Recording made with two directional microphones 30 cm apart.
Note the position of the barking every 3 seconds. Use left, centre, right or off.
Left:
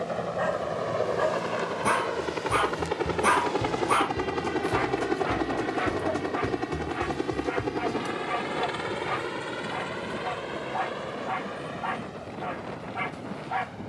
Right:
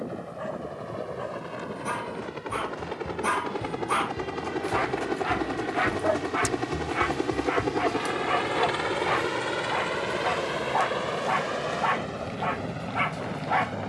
left, centre, right, right, right.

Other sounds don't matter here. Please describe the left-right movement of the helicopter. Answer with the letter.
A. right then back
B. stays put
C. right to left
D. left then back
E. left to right
E.